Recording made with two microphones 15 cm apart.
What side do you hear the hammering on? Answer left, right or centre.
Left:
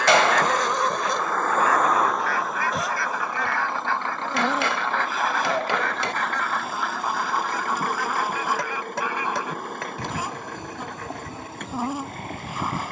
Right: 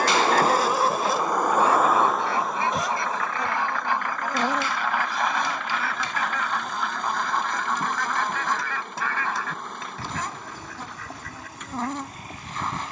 left.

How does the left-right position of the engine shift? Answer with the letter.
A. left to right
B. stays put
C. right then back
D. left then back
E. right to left
E.